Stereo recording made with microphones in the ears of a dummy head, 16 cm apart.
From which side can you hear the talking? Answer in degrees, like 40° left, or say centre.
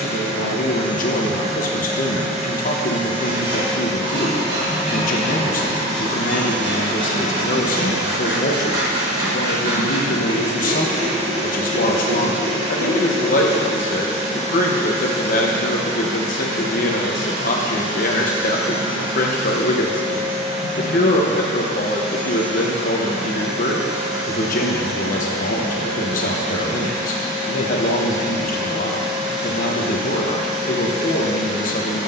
50° left.